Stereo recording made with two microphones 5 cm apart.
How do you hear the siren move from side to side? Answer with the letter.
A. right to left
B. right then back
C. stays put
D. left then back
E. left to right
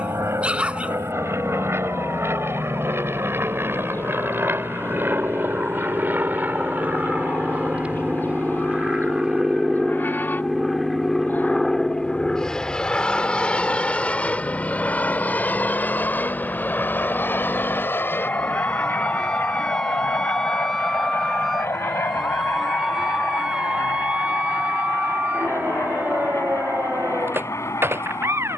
E.